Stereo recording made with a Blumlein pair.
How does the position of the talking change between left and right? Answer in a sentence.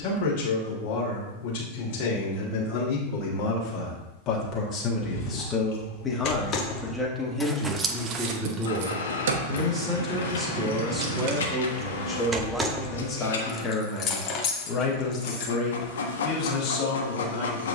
You can hear the talking go right and come back.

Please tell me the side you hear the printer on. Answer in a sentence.
You can hear the printer on the left.